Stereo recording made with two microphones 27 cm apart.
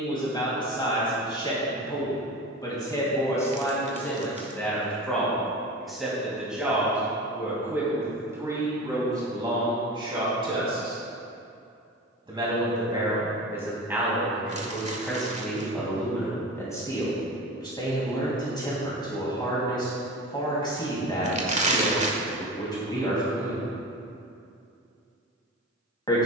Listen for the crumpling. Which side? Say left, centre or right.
right.